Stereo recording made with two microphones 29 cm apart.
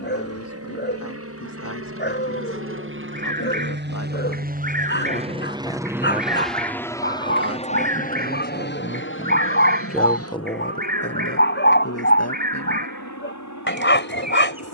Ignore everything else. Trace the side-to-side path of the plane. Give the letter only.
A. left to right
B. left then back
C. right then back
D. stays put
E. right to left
E.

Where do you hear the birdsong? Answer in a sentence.
You can hear the birdsong on the right.